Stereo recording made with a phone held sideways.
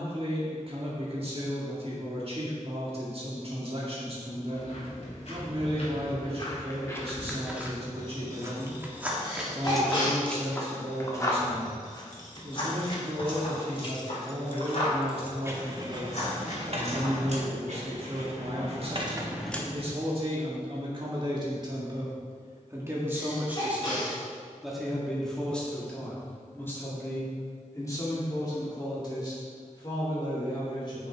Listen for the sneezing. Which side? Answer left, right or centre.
left.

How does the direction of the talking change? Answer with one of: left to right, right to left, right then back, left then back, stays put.
right to left.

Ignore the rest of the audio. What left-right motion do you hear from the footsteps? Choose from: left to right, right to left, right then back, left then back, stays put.
right then back.